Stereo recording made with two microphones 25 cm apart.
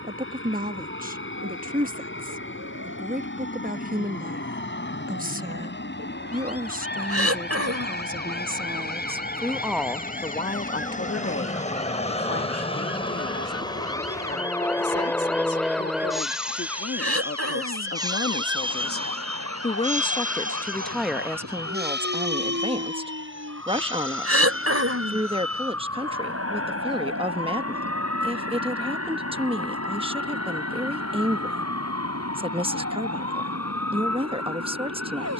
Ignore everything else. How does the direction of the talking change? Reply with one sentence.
You can hear the talking go left and come back.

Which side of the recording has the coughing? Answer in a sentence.
In this clip you hear the coughing on the right.